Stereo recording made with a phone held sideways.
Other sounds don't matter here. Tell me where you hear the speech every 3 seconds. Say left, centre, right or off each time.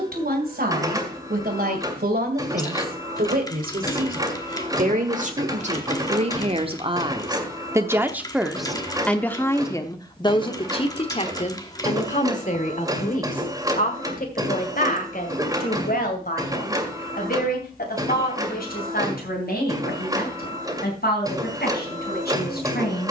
right, right, right, left, left, left, left, left.